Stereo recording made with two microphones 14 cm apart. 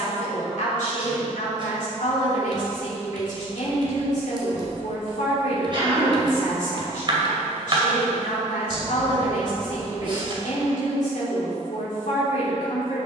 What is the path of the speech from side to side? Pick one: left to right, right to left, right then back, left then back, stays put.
stays put.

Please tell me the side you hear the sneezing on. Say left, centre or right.
right.